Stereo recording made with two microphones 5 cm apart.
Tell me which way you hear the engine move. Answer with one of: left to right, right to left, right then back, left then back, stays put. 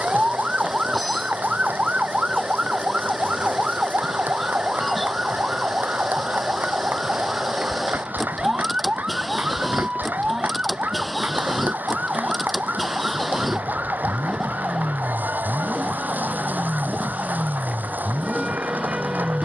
stays put.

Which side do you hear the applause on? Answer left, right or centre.
right.